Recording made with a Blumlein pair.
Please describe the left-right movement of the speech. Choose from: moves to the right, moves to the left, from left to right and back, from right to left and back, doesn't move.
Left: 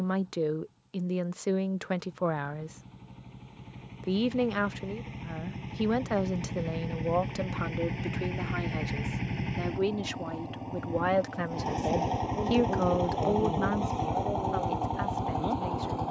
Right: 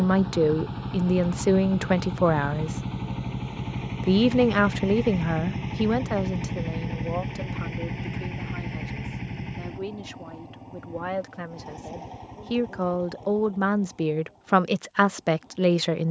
from right to left and back.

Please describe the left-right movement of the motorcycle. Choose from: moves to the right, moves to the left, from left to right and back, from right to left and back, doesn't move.
moves to the left.